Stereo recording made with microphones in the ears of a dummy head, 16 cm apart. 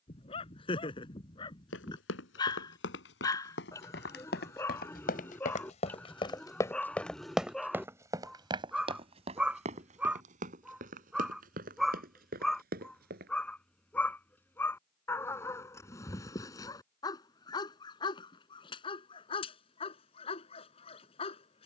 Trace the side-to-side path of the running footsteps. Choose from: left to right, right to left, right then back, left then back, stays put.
left to right.